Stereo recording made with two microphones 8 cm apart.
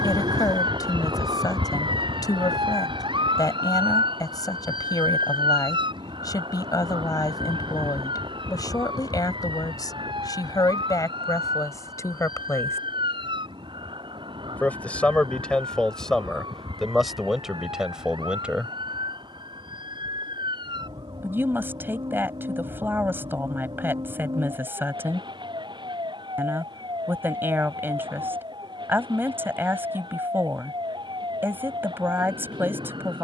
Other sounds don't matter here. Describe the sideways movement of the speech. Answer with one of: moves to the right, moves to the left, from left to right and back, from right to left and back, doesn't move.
moves to the right.